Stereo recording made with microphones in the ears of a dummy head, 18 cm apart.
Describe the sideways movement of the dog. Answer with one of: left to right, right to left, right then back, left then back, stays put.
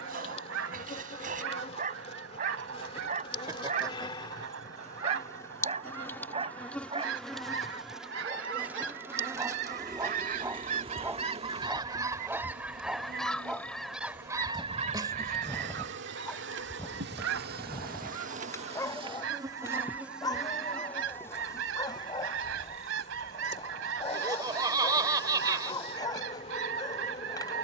right to left.